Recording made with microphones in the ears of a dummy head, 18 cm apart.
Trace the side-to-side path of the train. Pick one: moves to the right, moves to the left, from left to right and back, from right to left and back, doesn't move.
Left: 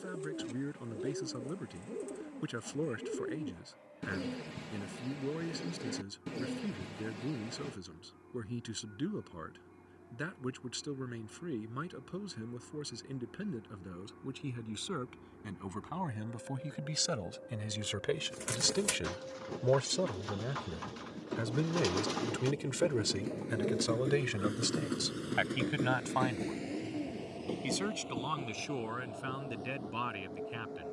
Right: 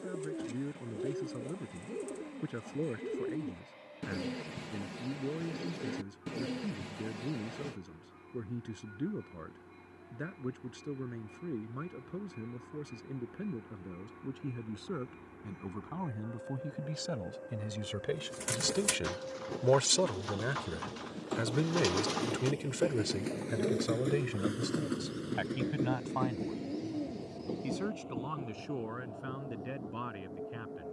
moves to the left.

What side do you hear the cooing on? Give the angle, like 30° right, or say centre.
10° right.